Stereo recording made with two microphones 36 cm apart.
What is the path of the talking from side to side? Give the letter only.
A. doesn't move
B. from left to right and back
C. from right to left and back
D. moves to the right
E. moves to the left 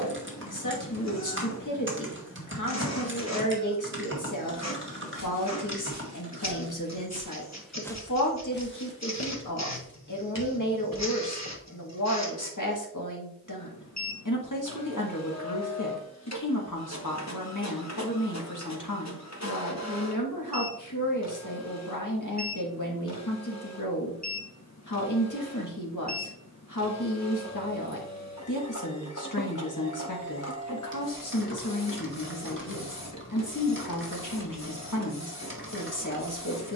A.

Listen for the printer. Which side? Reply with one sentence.
In this clip you hear the printer on the left.